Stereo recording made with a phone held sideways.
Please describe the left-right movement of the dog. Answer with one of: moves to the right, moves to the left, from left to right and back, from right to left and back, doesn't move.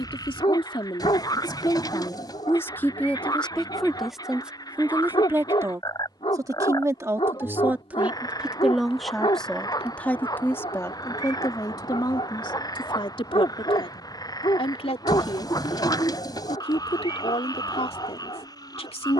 doesn't move.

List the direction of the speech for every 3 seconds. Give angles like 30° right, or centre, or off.
30° left, 10° right, 10° right, 20° left, 40° left, 50° left, 50° left.